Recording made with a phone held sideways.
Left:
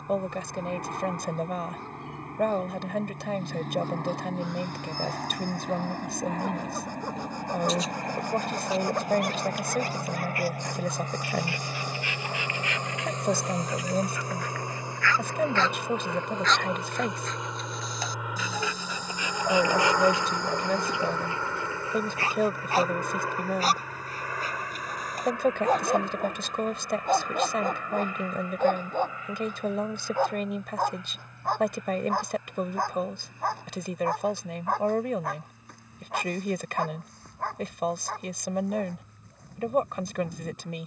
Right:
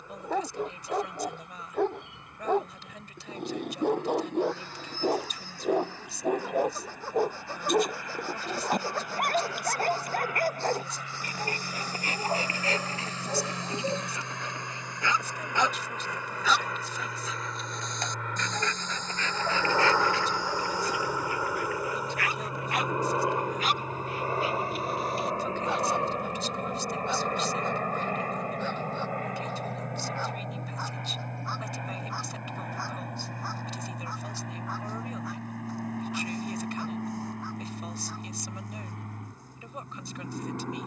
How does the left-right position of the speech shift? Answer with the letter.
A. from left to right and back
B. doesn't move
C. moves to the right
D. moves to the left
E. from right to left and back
B.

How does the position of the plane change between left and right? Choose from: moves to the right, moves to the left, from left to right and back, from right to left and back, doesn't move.
moves to the right.